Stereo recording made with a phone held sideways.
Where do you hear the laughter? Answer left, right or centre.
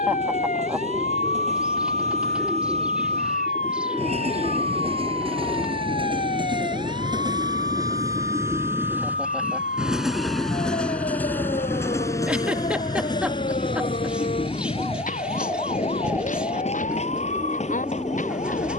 centre.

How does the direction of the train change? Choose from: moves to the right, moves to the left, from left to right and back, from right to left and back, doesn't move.
moves to the left.